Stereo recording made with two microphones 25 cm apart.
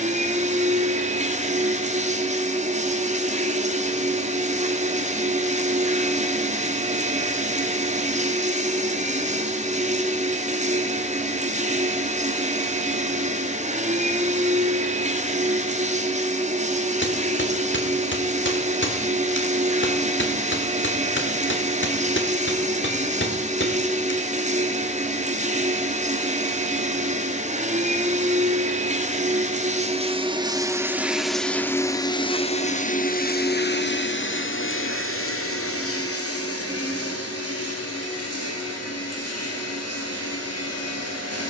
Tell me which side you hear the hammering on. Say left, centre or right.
left.